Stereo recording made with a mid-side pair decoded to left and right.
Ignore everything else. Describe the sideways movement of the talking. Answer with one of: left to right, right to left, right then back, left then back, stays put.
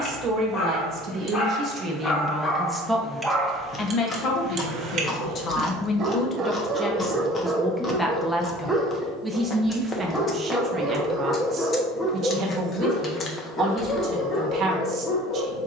left then back.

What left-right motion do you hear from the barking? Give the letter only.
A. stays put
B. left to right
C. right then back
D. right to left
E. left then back
C.